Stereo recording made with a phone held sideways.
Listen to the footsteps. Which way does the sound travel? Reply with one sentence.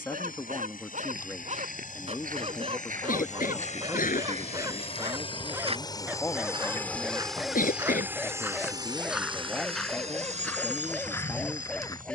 In this clip you hear the footsteps move to the left.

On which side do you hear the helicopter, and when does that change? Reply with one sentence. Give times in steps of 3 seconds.
In this clip you hear the helicopter on the left from 0 s, in the centre from 6 s and on the right from 9 s.